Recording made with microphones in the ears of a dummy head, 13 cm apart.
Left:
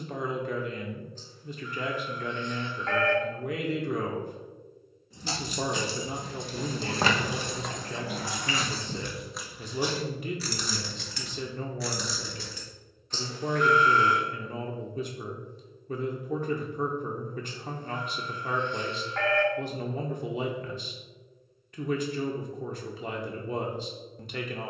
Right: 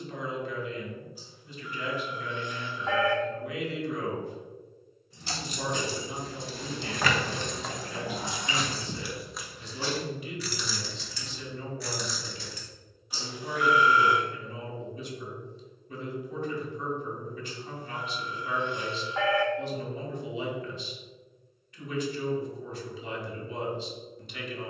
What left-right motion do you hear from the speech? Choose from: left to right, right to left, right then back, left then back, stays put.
stays put.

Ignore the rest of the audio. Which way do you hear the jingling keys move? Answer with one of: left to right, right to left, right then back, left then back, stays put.
right then back.